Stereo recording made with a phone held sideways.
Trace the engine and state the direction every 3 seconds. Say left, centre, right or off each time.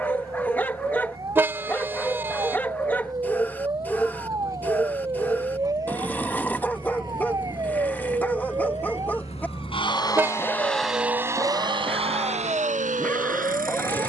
left, left, left, centre, right.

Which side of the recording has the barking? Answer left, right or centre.
centre.